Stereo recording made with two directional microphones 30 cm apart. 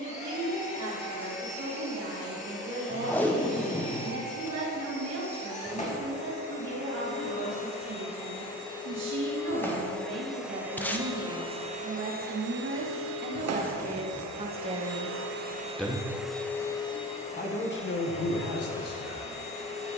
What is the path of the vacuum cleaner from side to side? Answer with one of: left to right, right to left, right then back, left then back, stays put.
right then back.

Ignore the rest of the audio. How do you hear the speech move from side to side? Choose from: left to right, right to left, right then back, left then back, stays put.
right to left.